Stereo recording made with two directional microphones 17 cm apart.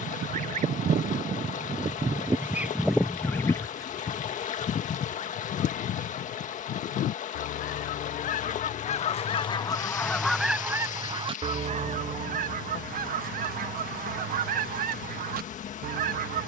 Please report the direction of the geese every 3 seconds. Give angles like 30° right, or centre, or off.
30° right, 30° left, 50° left, centre, 60° right, 60° right.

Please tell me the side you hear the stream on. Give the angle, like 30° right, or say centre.
50° left.